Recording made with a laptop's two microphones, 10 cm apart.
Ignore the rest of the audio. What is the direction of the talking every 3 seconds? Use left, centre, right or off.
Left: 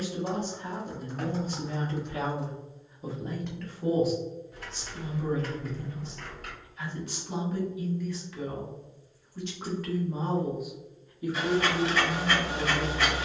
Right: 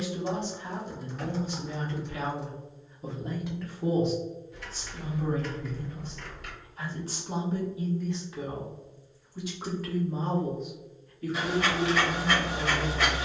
left, right, right, centre, left.